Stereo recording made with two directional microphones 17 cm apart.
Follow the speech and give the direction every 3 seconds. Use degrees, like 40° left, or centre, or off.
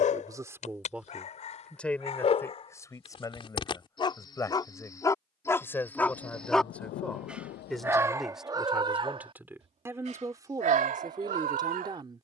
centre, 20° left, centre, 20° right.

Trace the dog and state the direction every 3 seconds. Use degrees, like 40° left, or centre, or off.
40° left, 20° left, 10° right, 50° right.